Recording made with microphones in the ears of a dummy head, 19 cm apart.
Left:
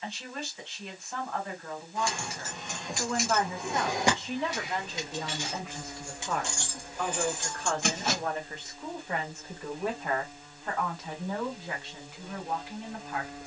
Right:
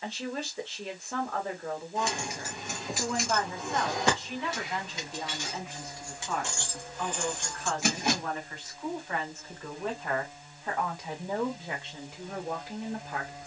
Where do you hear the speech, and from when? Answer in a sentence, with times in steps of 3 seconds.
You can hear the speech on the right from 0 s, on the left from 3 s, in the centre from 9 s and on the right from 12 s.